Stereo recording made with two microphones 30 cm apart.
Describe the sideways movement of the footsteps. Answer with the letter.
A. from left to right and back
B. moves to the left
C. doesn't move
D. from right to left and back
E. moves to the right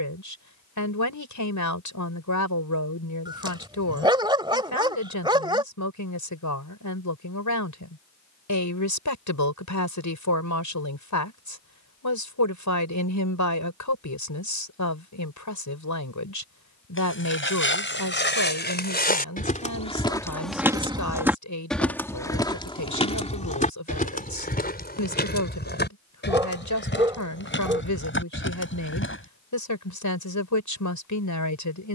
A.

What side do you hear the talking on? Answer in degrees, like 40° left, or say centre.
80° left.